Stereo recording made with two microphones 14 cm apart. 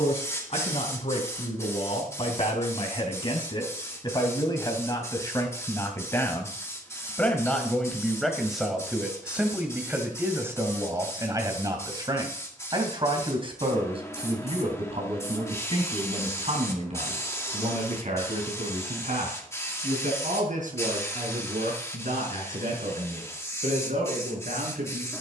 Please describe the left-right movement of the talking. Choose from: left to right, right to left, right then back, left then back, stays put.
left to right.